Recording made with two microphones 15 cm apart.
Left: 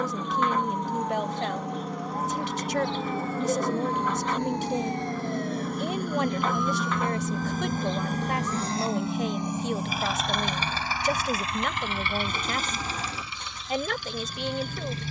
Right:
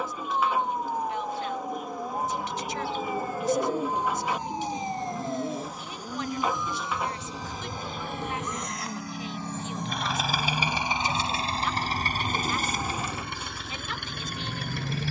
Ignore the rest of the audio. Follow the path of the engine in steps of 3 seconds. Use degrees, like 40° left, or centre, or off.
70° left, 70° left, 50° left, 10° right, 60° right.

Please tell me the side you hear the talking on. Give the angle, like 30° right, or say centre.
70° left.